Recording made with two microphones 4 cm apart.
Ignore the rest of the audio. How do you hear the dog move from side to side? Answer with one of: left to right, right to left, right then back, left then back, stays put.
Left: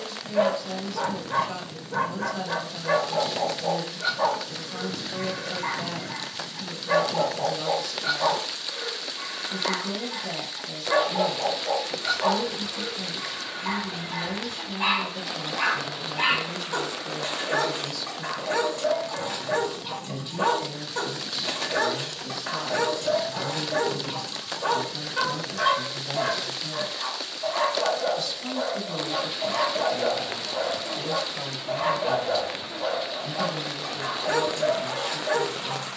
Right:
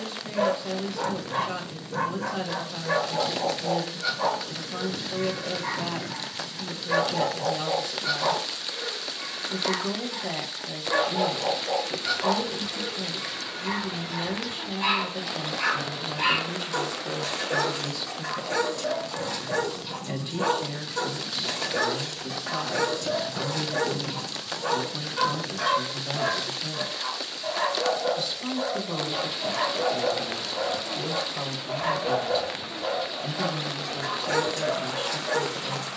stays put.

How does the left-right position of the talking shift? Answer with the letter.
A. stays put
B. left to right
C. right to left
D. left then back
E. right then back
A.